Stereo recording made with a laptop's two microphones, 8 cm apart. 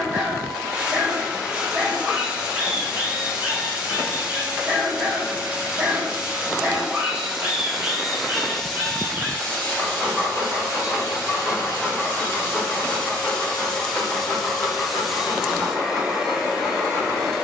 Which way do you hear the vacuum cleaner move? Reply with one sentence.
In this clip you hear the vacuum cleaner move from right to left and back again.